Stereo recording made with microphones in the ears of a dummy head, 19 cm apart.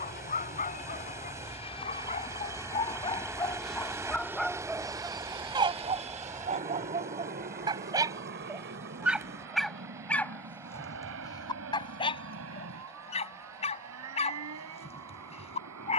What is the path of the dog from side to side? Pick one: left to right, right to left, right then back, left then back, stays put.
right then back.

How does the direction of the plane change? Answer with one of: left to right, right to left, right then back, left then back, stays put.
left to right.